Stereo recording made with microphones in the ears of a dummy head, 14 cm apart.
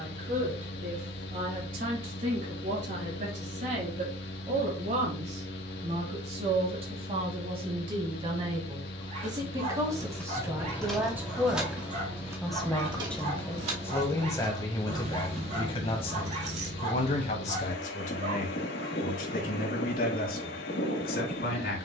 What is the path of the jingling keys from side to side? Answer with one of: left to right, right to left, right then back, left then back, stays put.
left to right.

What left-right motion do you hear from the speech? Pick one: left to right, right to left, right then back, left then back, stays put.
right to left.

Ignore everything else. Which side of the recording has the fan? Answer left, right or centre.
left.